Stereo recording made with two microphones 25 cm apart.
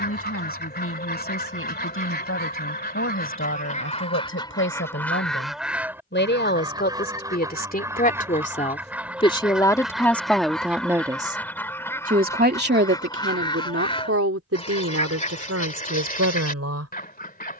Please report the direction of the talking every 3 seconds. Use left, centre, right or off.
left, left, left, centre, right, right.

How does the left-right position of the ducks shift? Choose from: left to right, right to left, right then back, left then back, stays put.
right then back.